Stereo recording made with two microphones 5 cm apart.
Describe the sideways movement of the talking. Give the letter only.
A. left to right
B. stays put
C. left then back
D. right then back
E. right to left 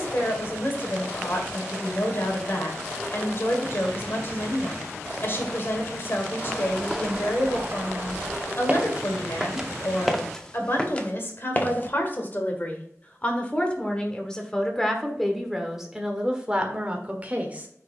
A.